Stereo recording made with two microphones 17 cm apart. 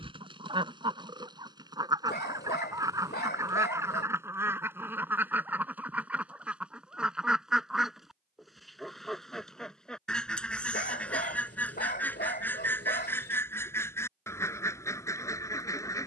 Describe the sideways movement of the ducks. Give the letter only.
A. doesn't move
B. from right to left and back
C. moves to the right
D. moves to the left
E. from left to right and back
D.